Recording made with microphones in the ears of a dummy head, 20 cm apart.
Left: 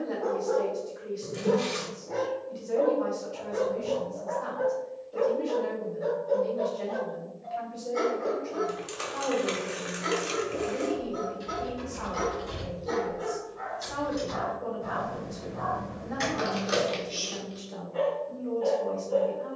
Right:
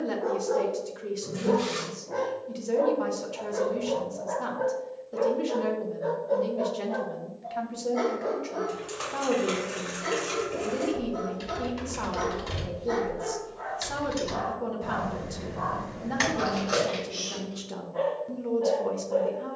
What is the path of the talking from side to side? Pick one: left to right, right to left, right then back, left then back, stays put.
stays put.